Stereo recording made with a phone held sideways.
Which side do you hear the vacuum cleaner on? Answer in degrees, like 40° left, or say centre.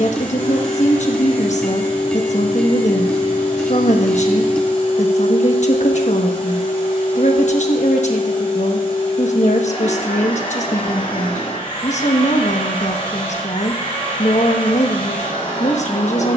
40° left.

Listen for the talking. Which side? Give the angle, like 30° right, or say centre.
60° left.